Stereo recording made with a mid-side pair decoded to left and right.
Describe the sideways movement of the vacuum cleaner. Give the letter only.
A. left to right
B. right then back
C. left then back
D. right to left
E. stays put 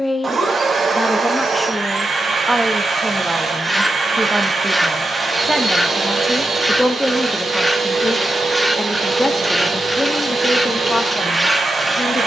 E.